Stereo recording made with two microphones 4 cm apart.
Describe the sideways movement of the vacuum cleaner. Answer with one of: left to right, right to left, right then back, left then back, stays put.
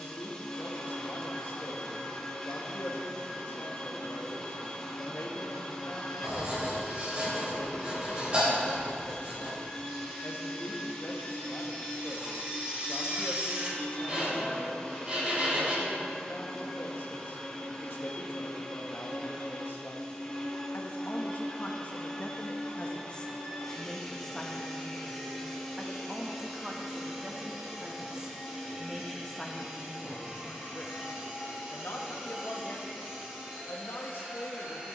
left to right.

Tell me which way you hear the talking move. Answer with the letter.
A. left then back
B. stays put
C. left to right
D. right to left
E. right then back
E.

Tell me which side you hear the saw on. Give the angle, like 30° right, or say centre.
30° right.